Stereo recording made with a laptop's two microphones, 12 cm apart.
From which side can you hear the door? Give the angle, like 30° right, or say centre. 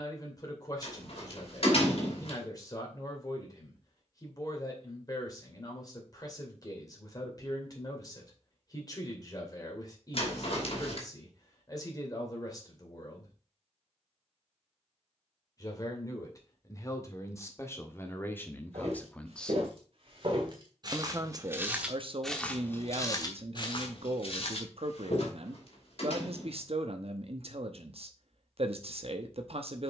50° left.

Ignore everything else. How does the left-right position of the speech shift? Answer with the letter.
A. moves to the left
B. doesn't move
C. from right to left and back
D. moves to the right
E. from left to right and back
D.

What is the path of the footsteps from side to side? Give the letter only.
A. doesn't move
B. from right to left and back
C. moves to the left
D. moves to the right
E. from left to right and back
C.